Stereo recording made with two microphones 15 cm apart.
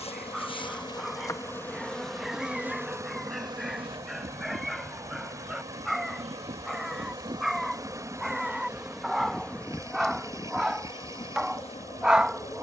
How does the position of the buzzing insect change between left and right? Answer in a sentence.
In this clip you hear the buzzing insect move from left to right and back again.